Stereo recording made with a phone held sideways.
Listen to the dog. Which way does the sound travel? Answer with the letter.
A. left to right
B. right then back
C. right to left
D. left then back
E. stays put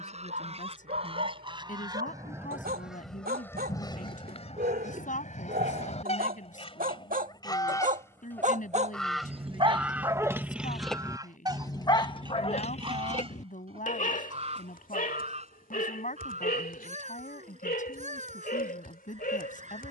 C.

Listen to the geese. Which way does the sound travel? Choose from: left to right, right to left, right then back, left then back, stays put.
left then back.